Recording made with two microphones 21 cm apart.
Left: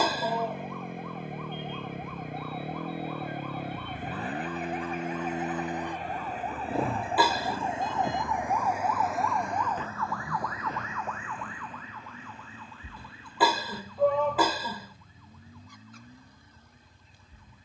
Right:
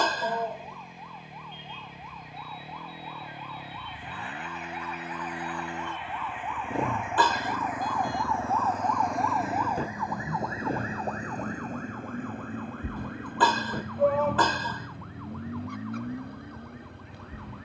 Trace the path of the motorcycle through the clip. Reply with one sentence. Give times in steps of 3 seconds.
In this clip you hear the motorcycle on the left from 0 s, in the centre from 6 s and on the right from 9 s.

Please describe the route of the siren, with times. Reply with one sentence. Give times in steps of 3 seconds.
In this clip you hear the siren on the left from 0 s and on the right from 9 s.